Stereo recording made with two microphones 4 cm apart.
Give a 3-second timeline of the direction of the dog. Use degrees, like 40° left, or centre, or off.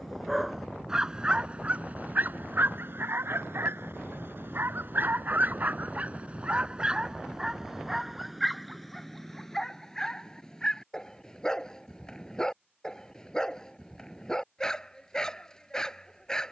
30° right, 60° right, 10° right, 20° left, 20° left, 20° left.